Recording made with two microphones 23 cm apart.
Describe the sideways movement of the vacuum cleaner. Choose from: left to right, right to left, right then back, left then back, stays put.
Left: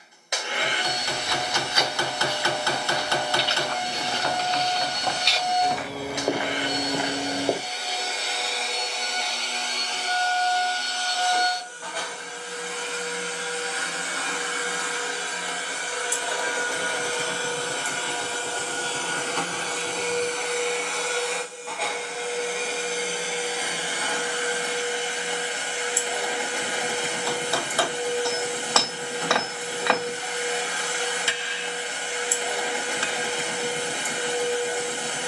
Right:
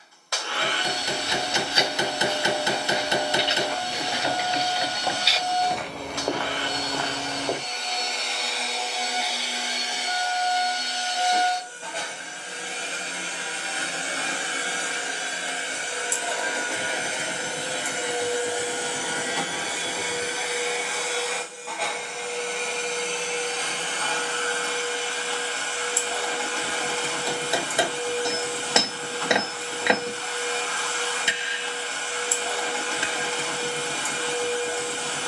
right then back.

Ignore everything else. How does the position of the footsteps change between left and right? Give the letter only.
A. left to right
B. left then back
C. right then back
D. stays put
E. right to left
E.